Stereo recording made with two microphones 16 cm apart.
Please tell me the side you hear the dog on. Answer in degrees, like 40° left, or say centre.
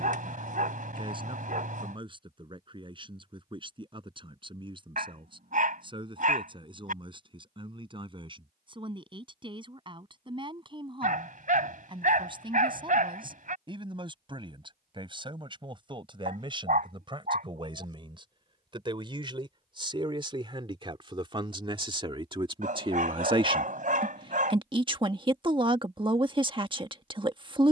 60° right.